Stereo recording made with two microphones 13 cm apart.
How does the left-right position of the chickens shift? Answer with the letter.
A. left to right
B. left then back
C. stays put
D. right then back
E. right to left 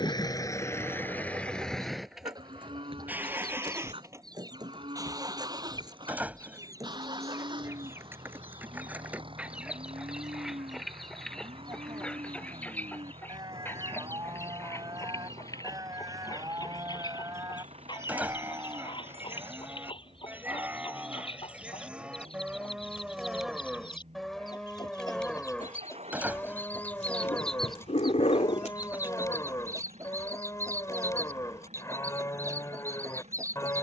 B.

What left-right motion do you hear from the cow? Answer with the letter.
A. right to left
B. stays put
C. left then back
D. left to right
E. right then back
A.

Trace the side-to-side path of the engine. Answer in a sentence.
In this clip you hear the engine move from left to right.